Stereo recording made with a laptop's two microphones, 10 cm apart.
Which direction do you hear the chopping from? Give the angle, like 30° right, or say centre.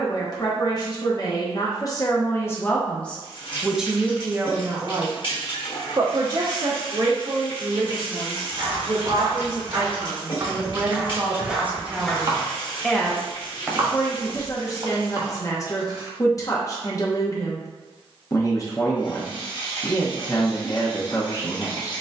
40° right.